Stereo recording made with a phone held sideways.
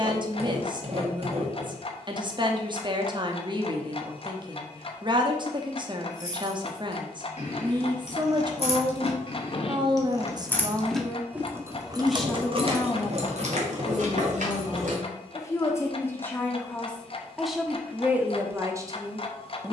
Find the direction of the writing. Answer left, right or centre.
right.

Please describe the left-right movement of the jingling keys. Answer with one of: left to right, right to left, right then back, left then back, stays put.
left to right.